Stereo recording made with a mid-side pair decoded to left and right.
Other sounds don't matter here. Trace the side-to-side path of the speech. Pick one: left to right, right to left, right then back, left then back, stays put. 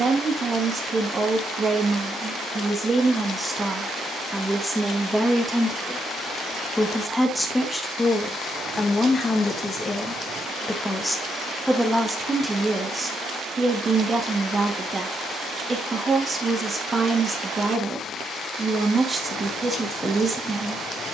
left then back.